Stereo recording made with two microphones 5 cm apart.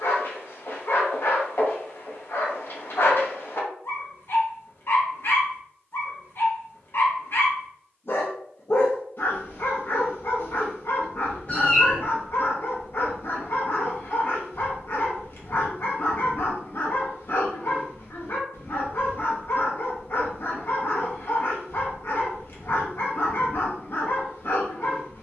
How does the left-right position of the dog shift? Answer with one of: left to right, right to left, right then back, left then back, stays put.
stays put.